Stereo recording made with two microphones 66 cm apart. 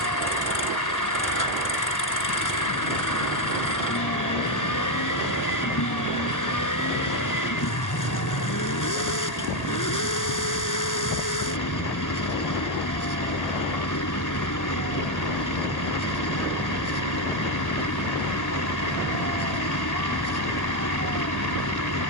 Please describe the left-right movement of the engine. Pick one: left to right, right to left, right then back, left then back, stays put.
stays put.